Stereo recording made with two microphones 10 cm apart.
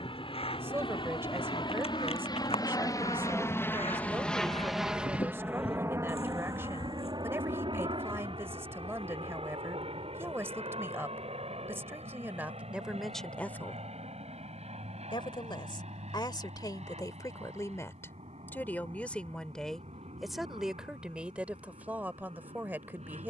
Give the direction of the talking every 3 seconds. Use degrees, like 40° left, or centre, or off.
20° right, 20° right, 20° right, 20° right, centre, 40° left, 10° left, 20° right.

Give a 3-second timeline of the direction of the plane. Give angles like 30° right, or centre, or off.
50° left, centre, 50° right, 60° right, 70° right, 80° right, 80° right, 80° right.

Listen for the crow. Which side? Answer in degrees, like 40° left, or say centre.
70° left.